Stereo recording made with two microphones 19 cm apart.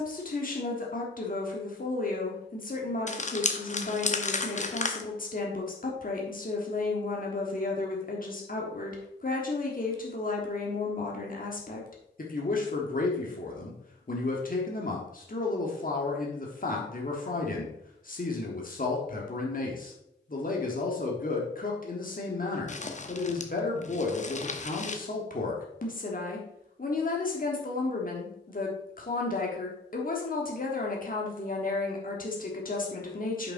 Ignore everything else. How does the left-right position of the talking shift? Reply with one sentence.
In this clip you hear the talking stay put.